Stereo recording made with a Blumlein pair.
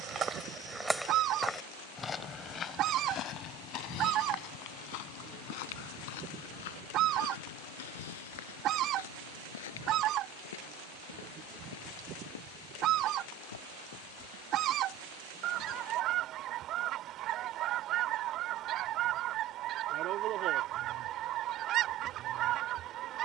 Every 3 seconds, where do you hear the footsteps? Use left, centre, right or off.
centre, left, left, left, left, off, off, off.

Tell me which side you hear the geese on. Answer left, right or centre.
right.